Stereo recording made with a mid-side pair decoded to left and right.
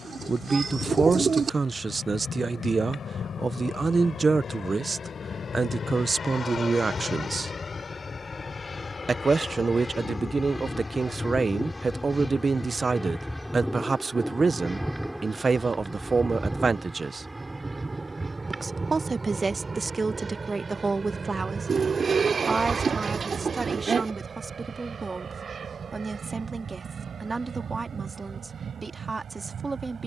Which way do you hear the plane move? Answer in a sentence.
You can hear the plane move from left to right.